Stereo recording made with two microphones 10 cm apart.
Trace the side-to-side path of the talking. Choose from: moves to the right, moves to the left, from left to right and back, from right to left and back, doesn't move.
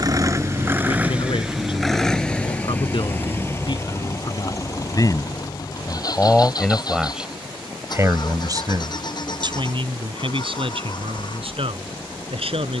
moves to the right.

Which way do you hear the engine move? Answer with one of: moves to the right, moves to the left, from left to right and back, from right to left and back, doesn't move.
moves to the left.